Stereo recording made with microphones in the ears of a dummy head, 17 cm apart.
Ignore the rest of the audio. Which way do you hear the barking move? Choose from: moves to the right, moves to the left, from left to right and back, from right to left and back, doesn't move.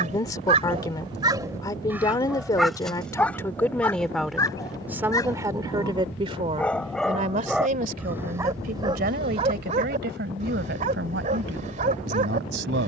from right to left and back.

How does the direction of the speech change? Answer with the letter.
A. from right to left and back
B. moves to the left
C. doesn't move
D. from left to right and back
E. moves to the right
E.